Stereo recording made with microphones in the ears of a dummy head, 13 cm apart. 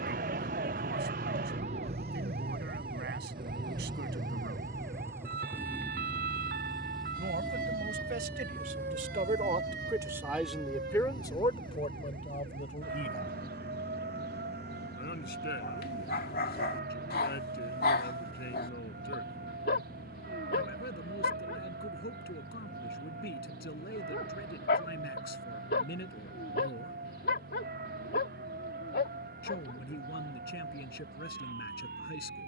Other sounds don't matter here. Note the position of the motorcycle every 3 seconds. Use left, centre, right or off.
right, right, centre, left, left, left, left, left, left, left, left.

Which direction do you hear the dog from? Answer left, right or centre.
left.